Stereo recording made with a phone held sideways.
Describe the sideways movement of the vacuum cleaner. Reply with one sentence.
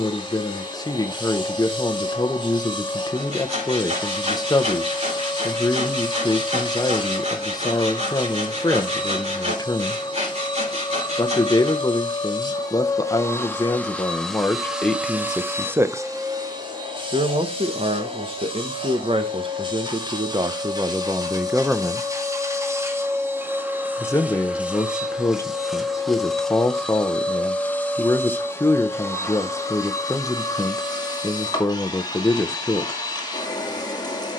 In this clip you hear the vacuum cleaner go right and come back.